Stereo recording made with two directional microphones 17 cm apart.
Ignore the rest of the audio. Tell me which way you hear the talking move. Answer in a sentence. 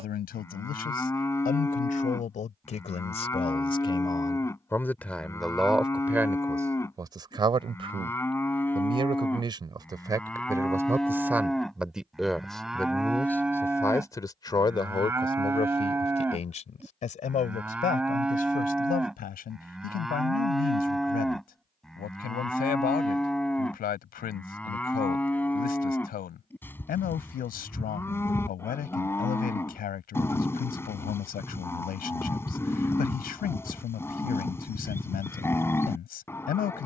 In this clip you hear the talking move from left to right and back again.